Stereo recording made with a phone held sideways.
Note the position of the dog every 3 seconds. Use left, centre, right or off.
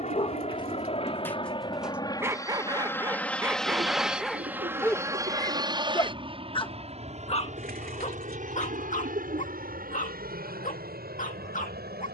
centre, centre, left, left.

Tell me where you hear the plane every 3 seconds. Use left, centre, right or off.
left, centre, right, right.